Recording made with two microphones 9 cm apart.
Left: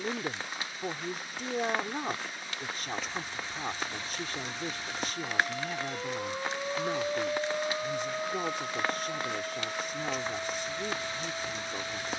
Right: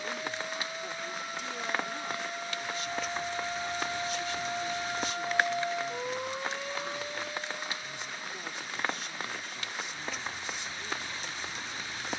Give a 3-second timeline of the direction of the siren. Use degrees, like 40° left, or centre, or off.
70° right, 40° right, 40° left, 80° left.